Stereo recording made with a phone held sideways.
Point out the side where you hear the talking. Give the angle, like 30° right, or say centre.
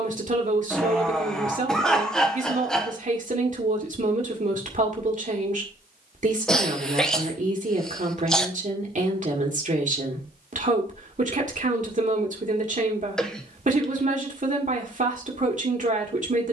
50° right.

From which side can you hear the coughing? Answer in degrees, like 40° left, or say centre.
centre.